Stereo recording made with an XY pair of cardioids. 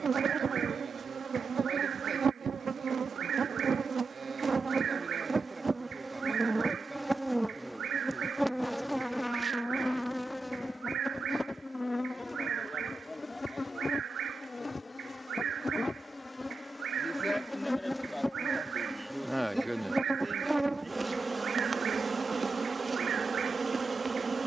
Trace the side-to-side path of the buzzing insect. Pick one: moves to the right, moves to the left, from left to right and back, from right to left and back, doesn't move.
from right to left and back.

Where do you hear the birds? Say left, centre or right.
right.